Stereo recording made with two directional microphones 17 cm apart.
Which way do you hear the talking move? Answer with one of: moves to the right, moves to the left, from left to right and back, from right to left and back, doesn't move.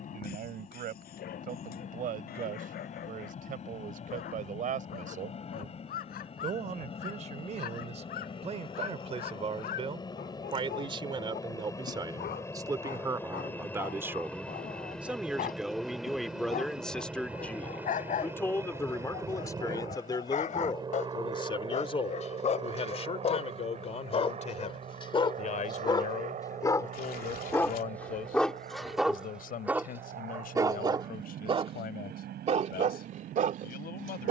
moves to the left.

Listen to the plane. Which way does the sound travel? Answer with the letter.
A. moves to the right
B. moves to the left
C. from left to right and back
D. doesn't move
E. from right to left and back
A.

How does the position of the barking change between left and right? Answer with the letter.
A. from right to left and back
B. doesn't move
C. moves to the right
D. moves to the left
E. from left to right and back
C.